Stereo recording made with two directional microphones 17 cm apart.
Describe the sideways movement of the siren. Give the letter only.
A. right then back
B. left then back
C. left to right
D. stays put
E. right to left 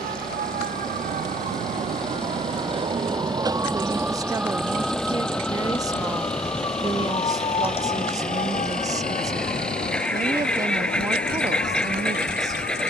E.